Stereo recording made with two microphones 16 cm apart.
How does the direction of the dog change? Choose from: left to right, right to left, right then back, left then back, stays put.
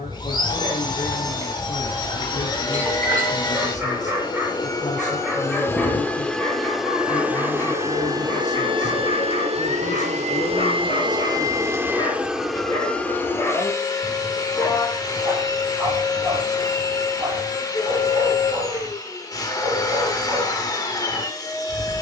left then back.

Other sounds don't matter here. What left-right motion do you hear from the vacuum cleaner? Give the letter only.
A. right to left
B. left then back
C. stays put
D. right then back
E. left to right
D.